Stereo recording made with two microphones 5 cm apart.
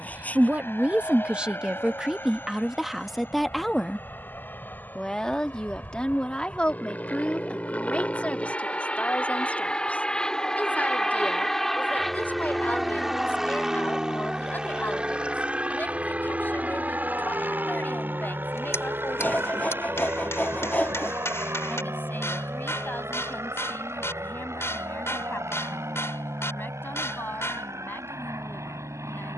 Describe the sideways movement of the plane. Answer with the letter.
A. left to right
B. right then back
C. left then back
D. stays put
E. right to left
A.